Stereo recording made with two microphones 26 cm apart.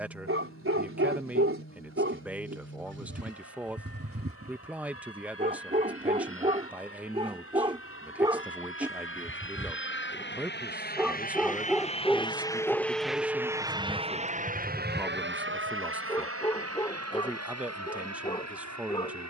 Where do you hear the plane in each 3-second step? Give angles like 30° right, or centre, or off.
80° left, 70° left, 70° left, 40° left, 10° right, 50° right, 70° right.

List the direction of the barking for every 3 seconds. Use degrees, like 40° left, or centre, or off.
50° right, 40° right, 20° right, centre, 10° left, 10° left, 20° left.